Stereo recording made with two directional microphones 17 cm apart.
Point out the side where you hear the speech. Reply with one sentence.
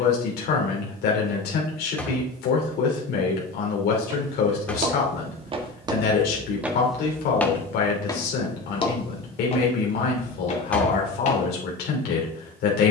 You can hear the speech on the left.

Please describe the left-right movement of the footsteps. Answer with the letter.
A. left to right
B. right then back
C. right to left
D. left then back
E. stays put
C.